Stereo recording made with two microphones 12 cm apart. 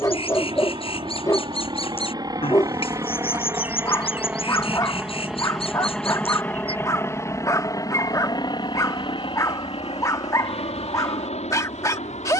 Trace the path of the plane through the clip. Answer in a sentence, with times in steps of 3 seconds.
In this clip you hear the plane on the right from 0 s, in the centre from 3 s and on the left from 6 s.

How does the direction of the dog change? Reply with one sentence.
You can hear the dog stay put.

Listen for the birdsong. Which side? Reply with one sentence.
You can hear the birdsong on the left.